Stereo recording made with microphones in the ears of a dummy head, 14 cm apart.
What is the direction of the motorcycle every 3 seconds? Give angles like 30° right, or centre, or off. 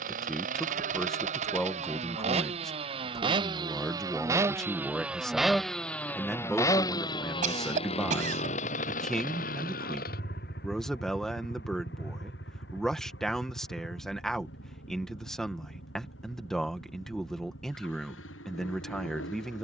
40° right, 10° right, 30° left, 60° left, 70° left, 80° left, 80° left.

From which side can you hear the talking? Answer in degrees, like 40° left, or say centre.
centre.